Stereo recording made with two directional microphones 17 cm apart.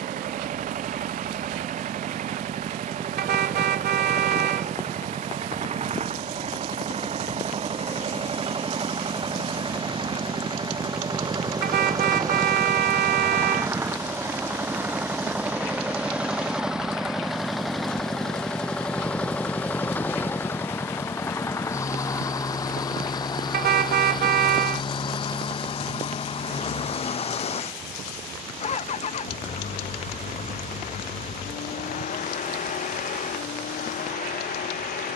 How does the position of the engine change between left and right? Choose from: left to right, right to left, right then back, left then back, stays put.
right to left.